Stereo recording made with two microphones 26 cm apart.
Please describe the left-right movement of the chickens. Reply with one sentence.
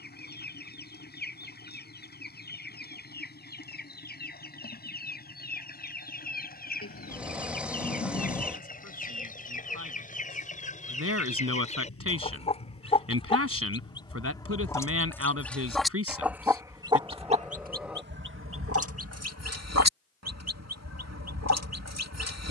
You can hear the chickens move to the right.